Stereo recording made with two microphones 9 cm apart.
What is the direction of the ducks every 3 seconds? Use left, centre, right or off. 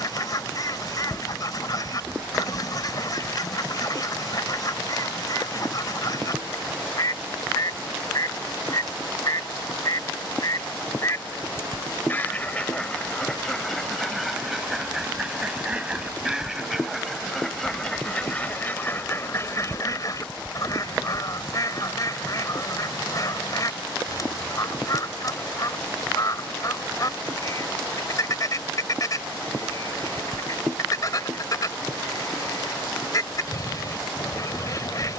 left, left, left, left, centre, centre, left, left, left, left, left, left.